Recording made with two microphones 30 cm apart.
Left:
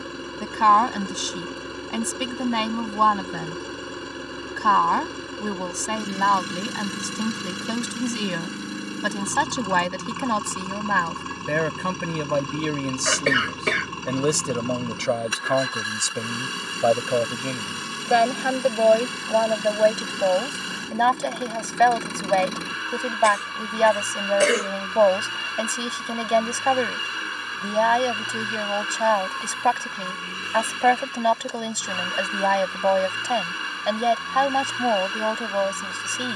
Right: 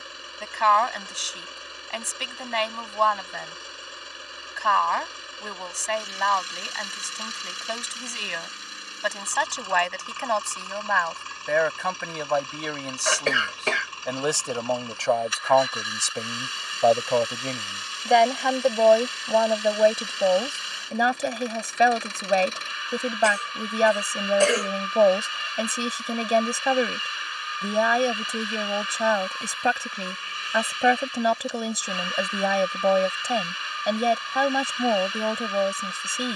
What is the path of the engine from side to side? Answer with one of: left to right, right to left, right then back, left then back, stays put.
stays put.